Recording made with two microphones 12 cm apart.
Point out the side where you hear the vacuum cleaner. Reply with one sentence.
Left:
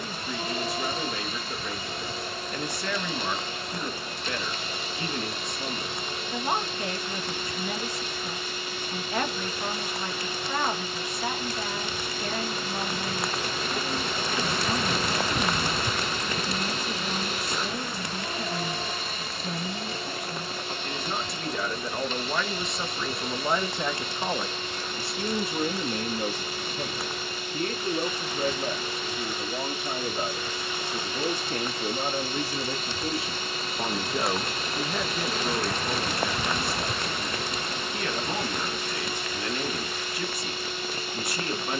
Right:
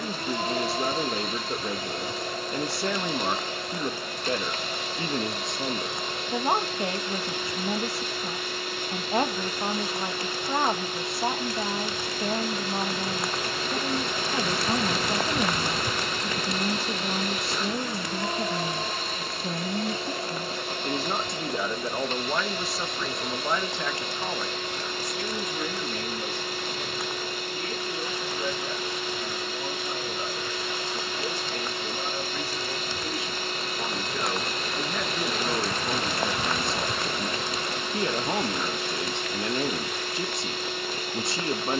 You can hear the vacuum cleaner on the right.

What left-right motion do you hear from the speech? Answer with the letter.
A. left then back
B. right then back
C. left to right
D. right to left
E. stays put
A.